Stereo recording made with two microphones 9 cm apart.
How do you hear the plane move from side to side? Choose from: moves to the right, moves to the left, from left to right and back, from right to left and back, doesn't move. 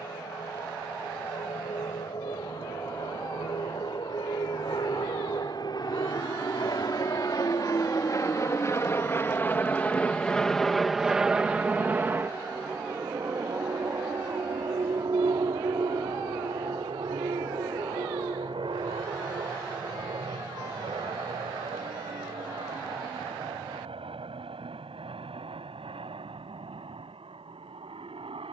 moves to the right.